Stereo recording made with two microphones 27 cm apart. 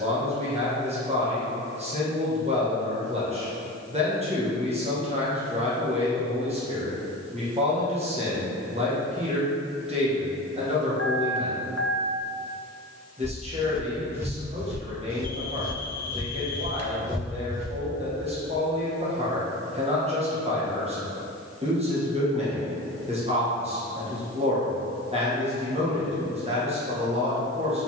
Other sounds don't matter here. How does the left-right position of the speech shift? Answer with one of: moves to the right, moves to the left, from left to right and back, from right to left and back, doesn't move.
doesn't move.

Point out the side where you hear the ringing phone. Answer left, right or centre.
left.